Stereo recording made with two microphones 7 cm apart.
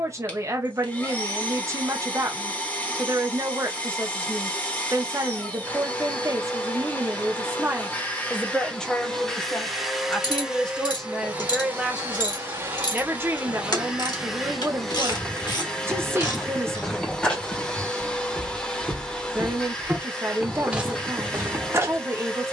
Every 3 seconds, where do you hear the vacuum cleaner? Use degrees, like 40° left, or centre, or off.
20° left, 20° left, 20° left, 10° right, 20° right, 10° left, 10° left, 10° left.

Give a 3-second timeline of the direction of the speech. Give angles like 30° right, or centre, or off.
40° right, 40° right, 30° right, 10° left, 30° right, 30° right, 30° right, 30° right.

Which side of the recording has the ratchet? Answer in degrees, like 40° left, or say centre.
60° left.